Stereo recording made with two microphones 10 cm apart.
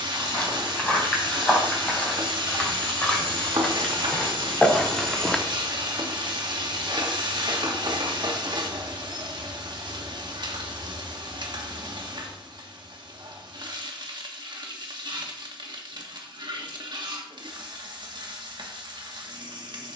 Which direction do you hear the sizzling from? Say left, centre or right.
right.